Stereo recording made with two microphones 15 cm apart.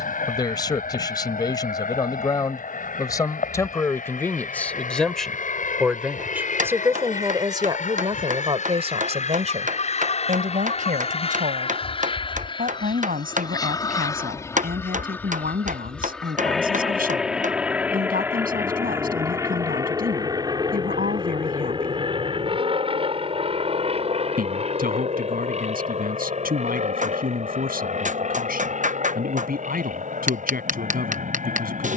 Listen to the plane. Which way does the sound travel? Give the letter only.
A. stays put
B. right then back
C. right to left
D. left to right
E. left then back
D.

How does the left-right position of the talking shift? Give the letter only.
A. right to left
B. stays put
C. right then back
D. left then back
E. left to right
E.